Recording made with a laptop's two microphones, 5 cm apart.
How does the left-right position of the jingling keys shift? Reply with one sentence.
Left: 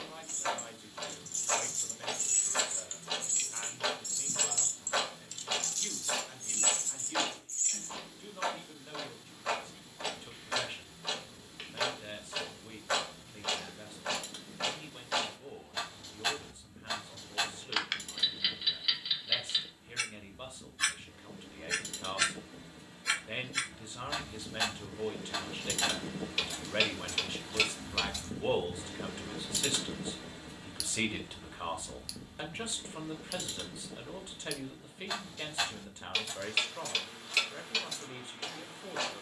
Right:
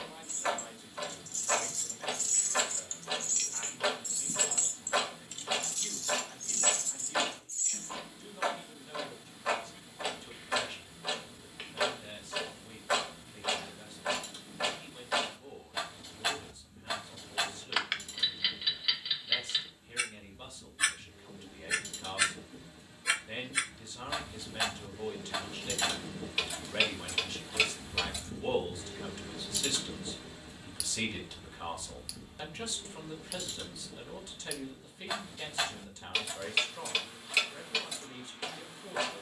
In this clip you hear the jingling keys move from left to right and back again.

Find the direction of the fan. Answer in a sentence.
You can hear the fan on the left.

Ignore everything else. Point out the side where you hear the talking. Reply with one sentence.
You can hear the talking on the left.